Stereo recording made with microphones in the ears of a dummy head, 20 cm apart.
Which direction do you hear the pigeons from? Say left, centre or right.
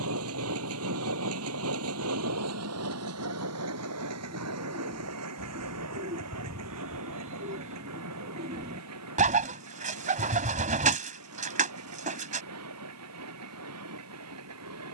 right.